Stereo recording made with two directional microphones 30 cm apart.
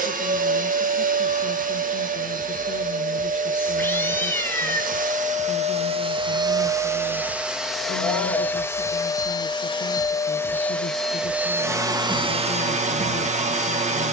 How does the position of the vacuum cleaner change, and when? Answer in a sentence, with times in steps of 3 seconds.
In this clip you hear the vacuum cleaner on the right from 0 s, in the centre from 6 s and on the right from 12 s.